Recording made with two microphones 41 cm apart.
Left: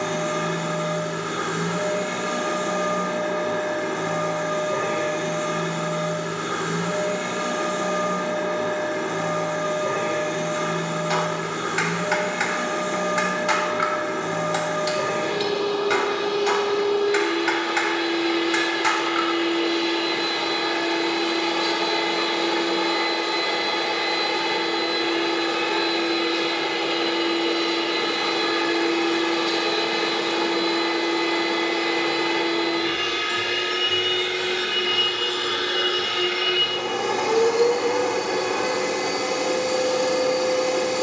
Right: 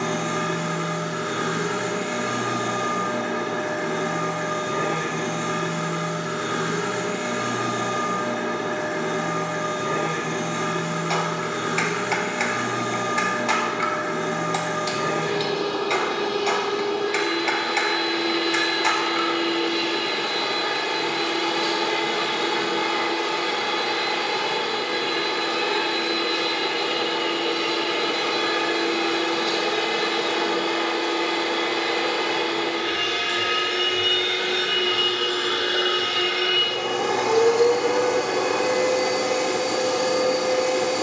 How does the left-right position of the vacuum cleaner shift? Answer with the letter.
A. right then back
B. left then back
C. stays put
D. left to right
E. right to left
E.